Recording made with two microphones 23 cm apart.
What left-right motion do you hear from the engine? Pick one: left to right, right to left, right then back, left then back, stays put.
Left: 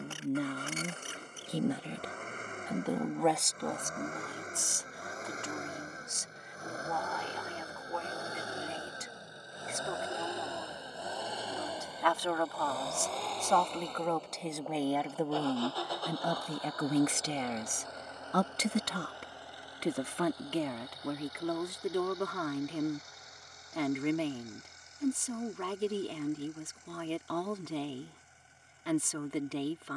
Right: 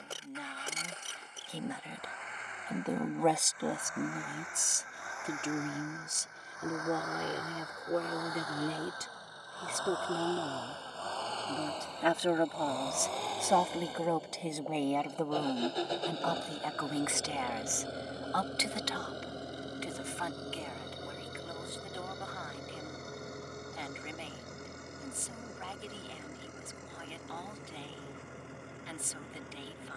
left to right.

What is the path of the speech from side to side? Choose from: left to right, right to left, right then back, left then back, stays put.
right then back.